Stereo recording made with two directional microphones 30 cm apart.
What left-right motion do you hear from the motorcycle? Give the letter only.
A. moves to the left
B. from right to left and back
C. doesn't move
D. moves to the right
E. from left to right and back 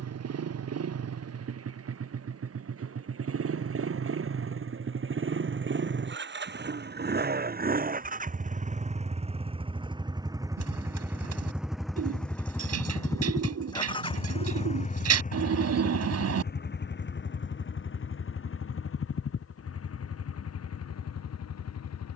A.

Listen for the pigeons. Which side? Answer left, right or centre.
right.